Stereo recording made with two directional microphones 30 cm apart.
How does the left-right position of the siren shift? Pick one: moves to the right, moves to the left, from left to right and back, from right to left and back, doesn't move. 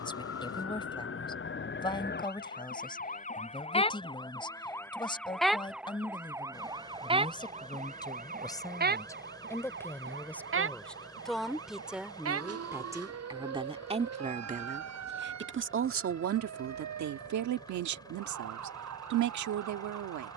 moves to the right.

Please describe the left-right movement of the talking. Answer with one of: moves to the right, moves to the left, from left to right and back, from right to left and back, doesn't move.
moves to the right.